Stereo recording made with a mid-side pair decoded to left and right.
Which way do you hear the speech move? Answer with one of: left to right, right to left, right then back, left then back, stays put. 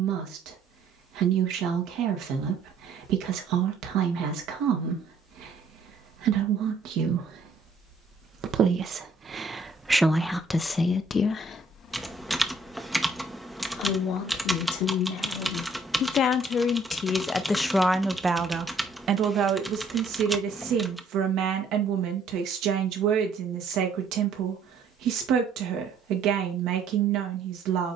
left then back.